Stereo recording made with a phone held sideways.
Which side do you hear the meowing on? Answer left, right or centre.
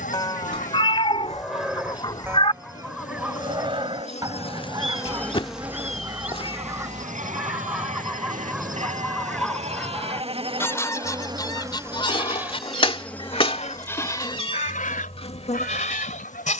left.